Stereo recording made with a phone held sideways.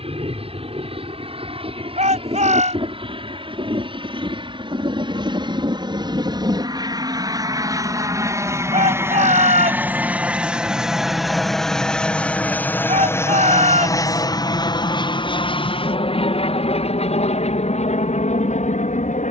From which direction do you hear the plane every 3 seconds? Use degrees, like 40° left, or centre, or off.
50° right, 40° right, 30° right, 10° right, 20° left, 50° left, 60° left.